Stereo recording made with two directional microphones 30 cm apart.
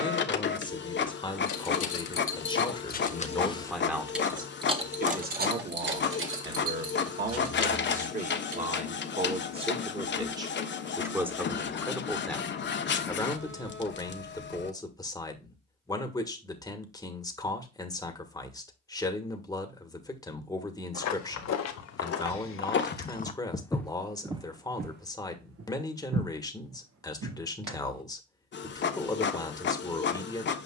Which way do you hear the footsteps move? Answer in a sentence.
You can hear the footsteps move to the right.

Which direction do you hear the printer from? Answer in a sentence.
In this clip you hear the printer on the left.